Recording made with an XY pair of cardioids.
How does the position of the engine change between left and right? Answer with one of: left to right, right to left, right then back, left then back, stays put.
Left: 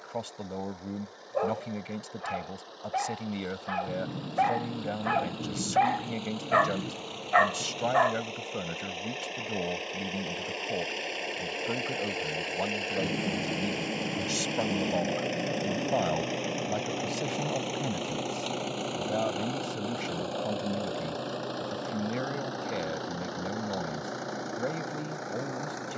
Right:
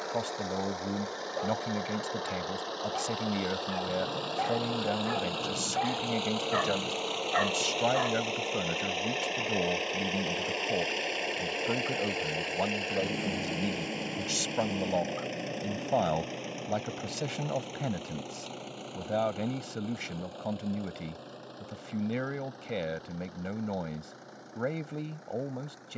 right to left.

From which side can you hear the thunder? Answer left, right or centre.
left.